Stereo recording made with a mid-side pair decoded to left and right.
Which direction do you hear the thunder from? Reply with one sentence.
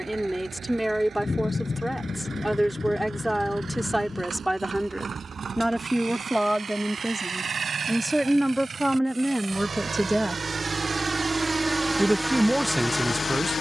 You can hear the thunder on the left.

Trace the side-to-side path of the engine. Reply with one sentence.
You can hear the engine travel towards the left.